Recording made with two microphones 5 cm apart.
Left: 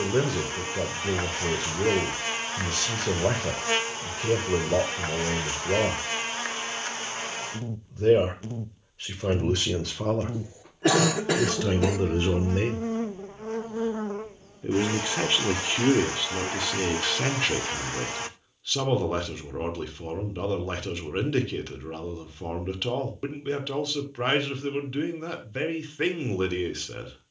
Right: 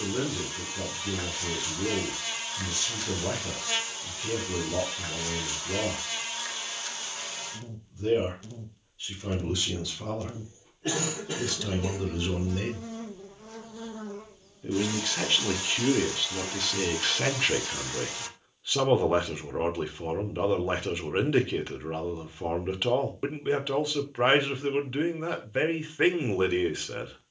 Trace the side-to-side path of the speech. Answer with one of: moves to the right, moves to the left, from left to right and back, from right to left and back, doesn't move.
moves to the right.